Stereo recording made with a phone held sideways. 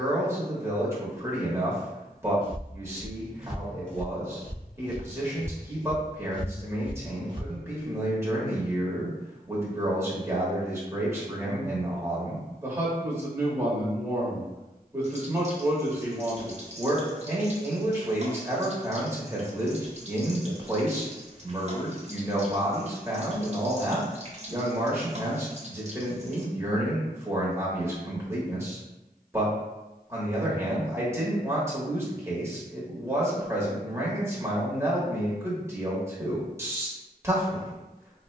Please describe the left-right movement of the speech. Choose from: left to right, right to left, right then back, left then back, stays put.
stays put.